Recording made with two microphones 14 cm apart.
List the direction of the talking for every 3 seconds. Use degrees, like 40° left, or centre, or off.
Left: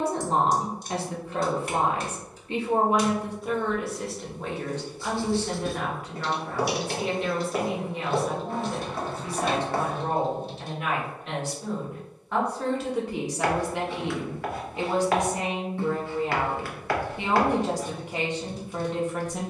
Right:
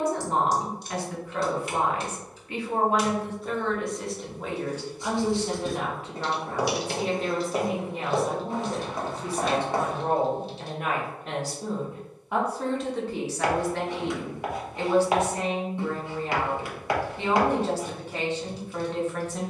30° left, centre, 40° right, 50° right, 10° left, 10° left, 10° left.